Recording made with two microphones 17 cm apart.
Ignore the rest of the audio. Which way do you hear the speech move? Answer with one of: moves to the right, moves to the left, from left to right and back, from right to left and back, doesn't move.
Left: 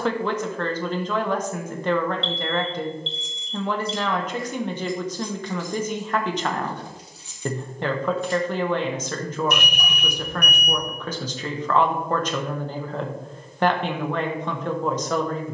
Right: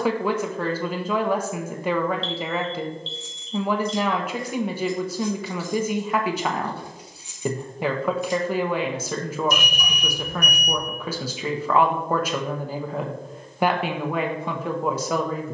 doesn't move.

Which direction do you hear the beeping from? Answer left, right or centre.
left.